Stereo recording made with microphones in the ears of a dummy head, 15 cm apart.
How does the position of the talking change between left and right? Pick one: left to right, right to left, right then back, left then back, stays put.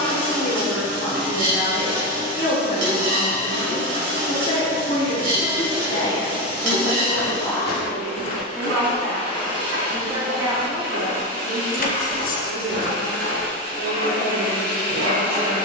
left to right.